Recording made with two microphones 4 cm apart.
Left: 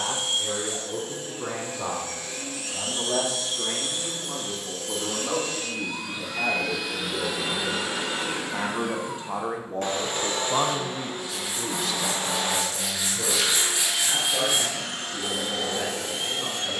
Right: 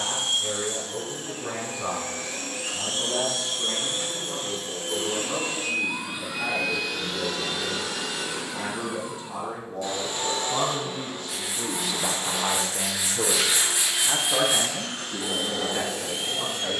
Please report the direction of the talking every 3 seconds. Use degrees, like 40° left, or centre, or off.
80° left, 70° left, 60° left, 30° left, 40° right, 70° right.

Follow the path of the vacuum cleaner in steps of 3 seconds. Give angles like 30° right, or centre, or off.
60° right, 40° right, 20° left, 60° left, 80° left, 80° left.